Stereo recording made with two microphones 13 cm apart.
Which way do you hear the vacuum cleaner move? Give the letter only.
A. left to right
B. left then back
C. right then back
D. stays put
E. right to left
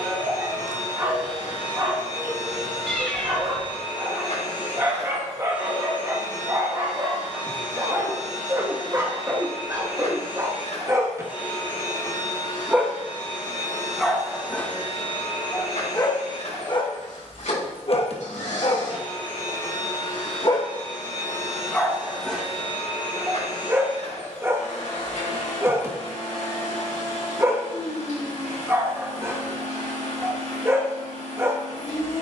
D.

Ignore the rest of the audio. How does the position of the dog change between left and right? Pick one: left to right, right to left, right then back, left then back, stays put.
left then back.